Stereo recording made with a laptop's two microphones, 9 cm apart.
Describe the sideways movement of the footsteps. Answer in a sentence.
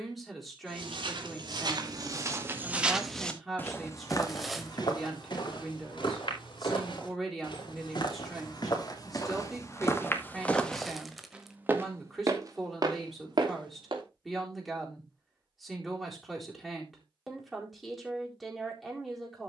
You can hear the footsteps go left and come back.